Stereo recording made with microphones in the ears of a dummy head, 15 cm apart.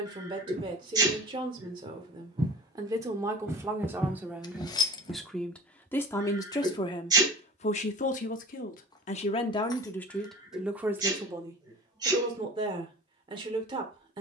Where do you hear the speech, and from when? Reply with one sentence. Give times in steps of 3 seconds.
In this clip you hear the speech on the right from 0 s, in the centre from 3 s, on the left from 6 s, in the centre from 9 s and on the right from 12 s.